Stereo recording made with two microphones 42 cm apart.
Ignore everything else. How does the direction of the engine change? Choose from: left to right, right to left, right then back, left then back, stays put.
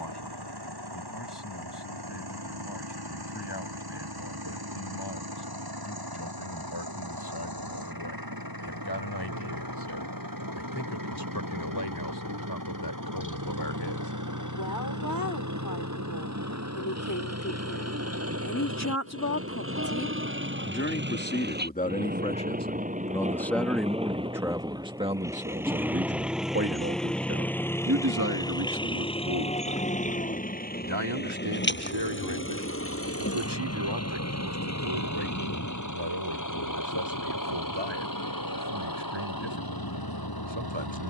right to left.